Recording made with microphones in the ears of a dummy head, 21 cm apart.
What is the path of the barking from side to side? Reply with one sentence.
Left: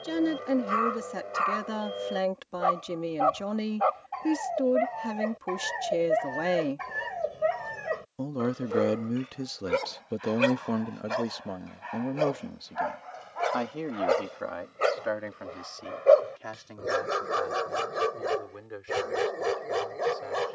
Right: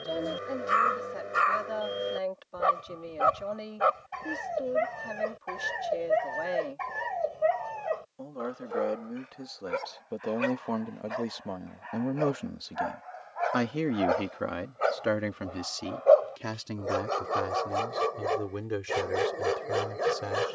You can hear the barking go left and come back.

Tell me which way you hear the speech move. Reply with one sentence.
You can hear the speech move from left to right.